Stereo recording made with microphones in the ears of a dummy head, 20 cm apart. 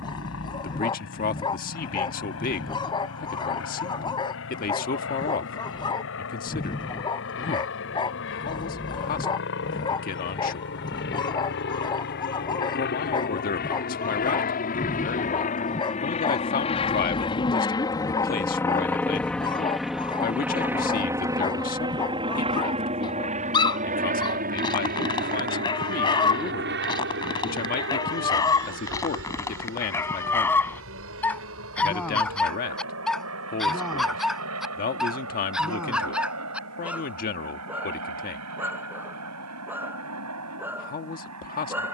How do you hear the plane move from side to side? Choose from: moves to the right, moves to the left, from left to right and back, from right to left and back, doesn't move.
moves to the right.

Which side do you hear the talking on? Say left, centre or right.
left.